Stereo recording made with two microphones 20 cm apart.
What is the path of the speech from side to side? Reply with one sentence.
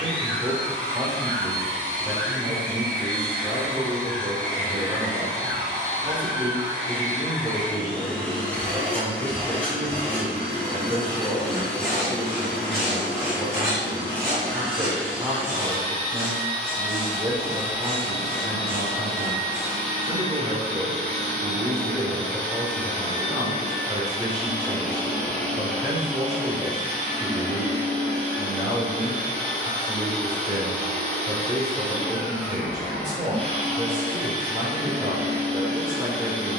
In this clip you hear the speech stay in one place.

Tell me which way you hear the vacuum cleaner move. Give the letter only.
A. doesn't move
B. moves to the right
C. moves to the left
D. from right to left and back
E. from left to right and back
A.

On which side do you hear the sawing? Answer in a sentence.
You can hear the sawing in the centre.